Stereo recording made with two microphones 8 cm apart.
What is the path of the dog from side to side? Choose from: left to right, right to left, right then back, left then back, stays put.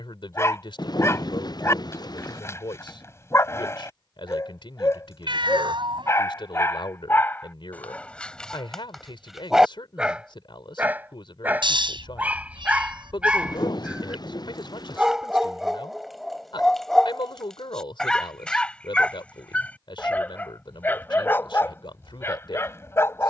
right then back.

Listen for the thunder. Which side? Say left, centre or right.
left.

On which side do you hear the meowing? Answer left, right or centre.
right.